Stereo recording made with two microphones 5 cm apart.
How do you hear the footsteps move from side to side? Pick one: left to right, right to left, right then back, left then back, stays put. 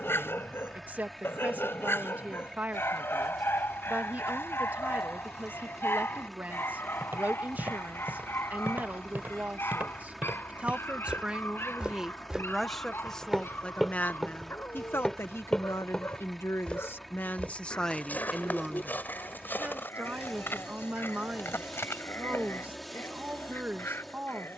right to left.